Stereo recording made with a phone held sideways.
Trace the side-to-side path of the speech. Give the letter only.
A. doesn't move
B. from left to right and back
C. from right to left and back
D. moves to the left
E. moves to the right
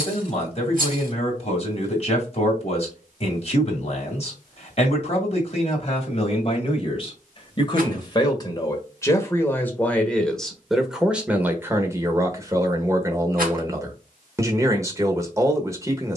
E.